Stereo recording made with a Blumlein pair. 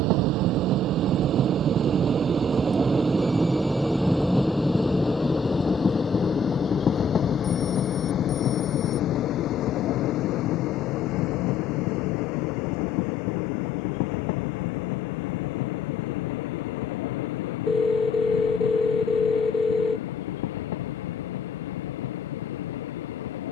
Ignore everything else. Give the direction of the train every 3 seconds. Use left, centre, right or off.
right, centre, left, left, left, left, left, left.